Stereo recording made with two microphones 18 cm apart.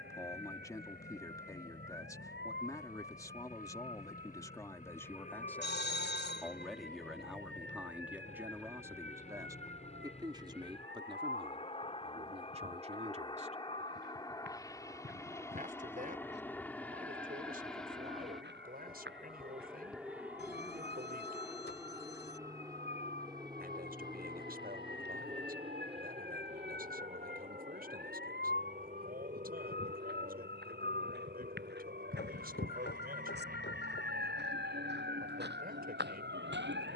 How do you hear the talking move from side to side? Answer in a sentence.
In this clip you hear the talking go from the left side to the right.